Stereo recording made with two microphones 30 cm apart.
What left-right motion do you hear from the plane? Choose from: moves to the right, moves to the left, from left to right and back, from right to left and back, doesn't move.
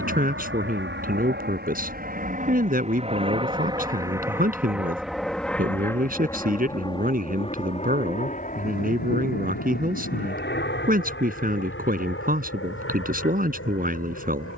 moves to the left.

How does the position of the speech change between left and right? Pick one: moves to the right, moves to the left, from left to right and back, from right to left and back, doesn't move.
doesn't move.